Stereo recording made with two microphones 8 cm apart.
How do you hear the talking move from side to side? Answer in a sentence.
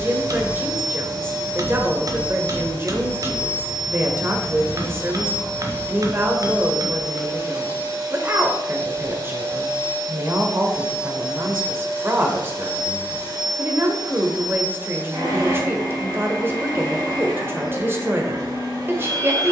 In this clip you hear the talking stay put.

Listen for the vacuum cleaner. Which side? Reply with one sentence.
You can hear the vacuum cleaner on the right.